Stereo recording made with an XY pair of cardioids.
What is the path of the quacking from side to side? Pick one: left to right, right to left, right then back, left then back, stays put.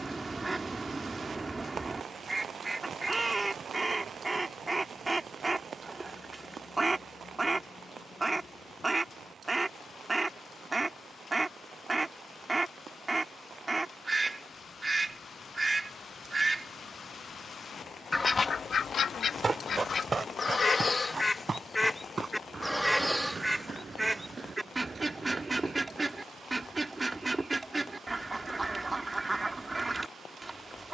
left then back.